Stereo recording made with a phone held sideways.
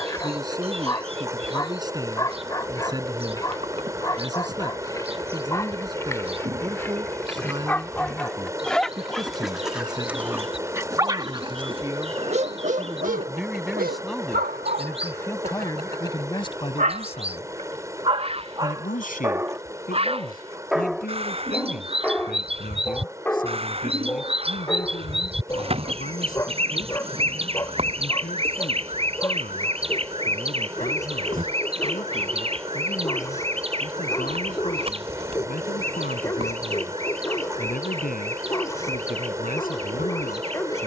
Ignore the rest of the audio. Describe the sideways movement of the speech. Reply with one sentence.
In this clip you hear the speech go from the right side to the left.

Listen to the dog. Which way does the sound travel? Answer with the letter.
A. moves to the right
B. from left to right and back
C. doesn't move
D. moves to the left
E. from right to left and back
B.